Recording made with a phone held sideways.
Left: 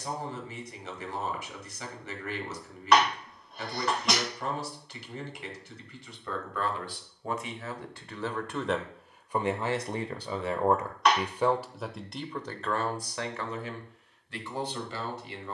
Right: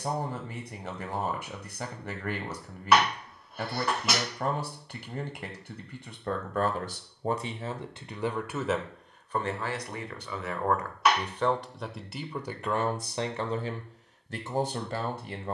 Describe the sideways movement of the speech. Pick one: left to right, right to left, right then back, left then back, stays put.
left then back.